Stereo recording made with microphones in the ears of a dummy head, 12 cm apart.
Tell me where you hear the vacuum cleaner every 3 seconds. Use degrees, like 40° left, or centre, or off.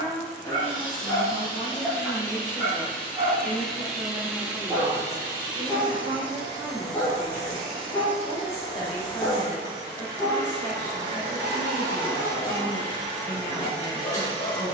20° left, 10° right, 40° right, 40° right, 40° right.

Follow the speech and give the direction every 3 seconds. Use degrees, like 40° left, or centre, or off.
30° left, 10° right, 20° right, 20° left, 30° left.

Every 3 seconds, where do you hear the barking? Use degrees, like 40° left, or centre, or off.
10° left, centre, 30° left, 30° left, 30° left.